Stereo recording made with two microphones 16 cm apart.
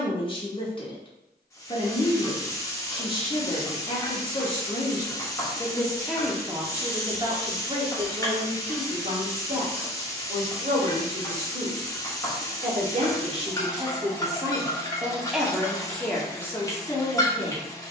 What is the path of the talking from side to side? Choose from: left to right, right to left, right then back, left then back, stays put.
right then back.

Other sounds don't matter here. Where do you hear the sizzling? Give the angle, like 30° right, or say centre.
20° left.